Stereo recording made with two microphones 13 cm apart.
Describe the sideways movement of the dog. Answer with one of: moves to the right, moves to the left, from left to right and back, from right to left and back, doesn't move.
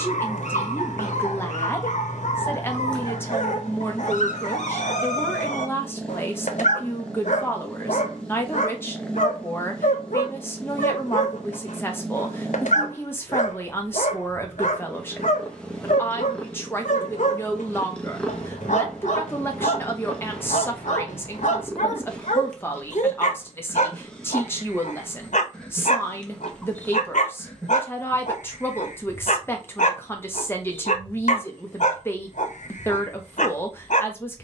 doesn't move.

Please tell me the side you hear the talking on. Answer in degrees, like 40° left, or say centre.
20° left.